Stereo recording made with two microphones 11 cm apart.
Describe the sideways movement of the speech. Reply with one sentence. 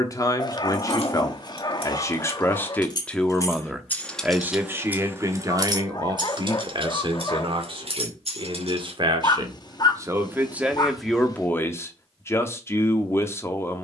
In this clip you hear the speech move from left to right and back again.